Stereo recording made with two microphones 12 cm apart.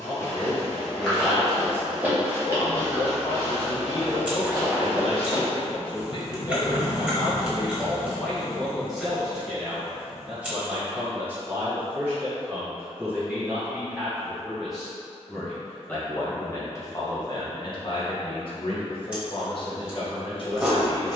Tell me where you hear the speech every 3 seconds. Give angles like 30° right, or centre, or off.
50° left, 50° left, 20° left, 10° right, 10° right, 30° left, 50° left.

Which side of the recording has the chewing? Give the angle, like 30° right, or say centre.
10° right.